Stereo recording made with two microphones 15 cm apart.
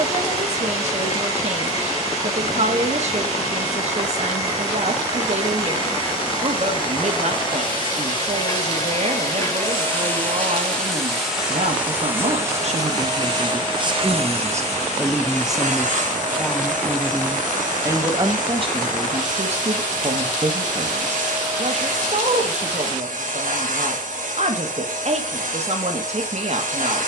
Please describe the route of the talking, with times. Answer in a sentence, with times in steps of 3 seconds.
In this clip you hear the talking on the right from 0 s, in the centre from 15 s and on the right from 18 s.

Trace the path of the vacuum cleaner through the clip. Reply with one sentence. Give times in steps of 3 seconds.
In this clip you hear the vacuum cleaner on the left from 0 s, in the centre from 9 s and on the right from 12 s.